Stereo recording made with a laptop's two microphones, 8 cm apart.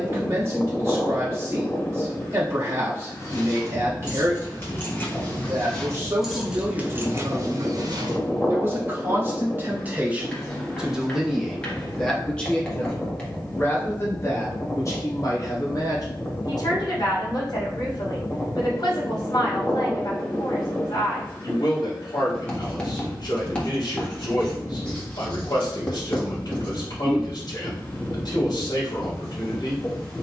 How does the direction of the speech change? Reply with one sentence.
You can hear the speech travel towards the left.